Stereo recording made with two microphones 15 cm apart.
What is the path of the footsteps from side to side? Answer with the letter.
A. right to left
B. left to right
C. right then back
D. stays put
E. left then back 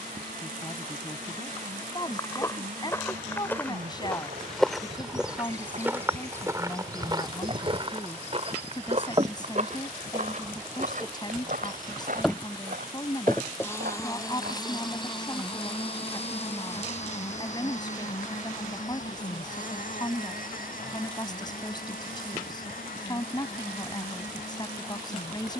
B.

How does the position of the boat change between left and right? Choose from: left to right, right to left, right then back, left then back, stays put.
right to left.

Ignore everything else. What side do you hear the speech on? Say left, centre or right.
left.